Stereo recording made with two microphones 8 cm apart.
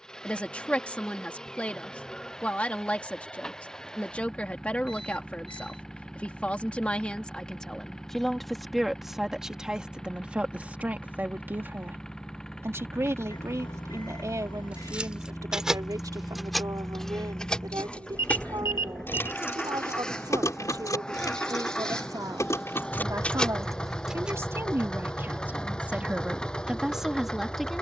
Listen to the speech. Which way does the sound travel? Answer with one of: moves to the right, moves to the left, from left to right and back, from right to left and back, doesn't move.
from left to right and back.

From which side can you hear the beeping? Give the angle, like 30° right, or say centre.
70° left.